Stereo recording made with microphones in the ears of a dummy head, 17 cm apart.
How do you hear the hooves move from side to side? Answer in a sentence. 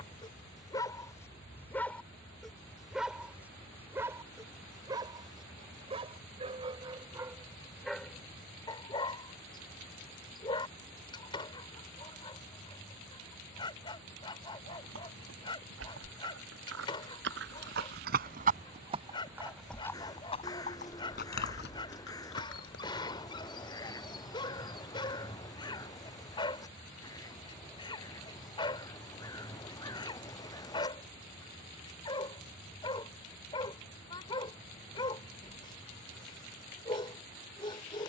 You can hear the hooves move to the left.